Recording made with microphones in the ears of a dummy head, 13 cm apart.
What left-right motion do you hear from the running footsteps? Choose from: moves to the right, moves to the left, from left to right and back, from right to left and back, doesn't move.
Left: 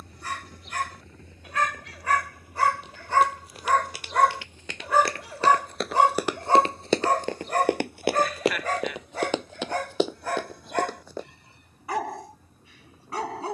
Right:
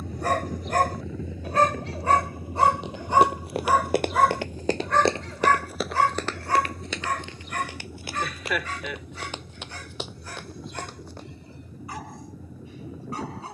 moves to the left.